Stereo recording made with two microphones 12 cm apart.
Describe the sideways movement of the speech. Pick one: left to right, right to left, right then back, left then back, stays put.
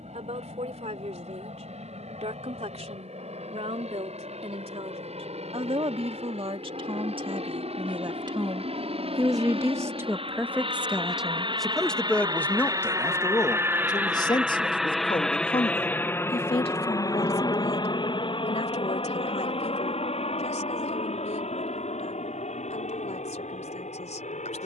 right to left.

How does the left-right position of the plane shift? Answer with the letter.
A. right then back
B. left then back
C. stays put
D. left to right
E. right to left
E.